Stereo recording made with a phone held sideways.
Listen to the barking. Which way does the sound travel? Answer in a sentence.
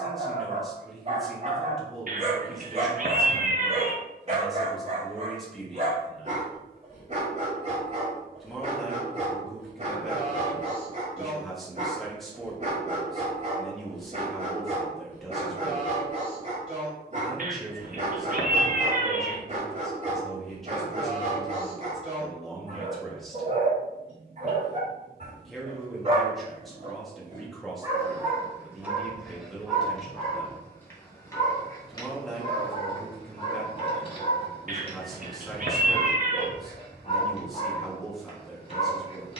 In this clip you hear the barking go from the right side to the left.